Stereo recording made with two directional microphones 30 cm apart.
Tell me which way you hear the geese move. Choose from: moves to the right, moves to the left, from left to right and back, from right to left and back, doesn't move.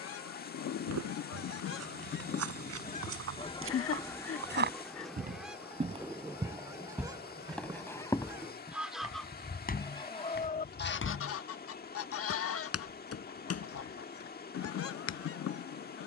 from left to right and back.